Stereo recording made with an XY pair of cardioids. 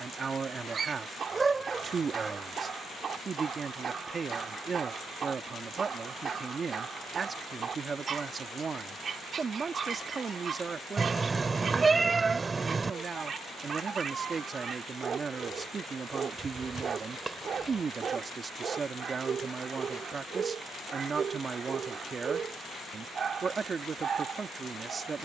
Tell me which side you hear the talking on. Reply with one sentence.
In this clip you hear the talking on the right.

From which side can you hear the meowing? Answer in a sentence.
You can hear the meowing on the right.